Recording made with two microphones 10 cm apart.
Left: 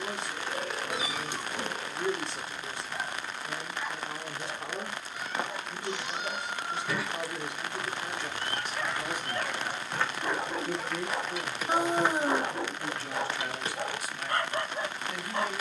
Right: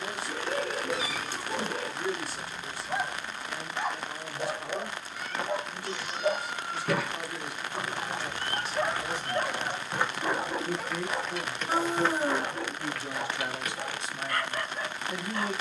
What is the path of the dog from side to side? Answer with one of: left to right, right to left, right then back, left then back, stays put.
right to left.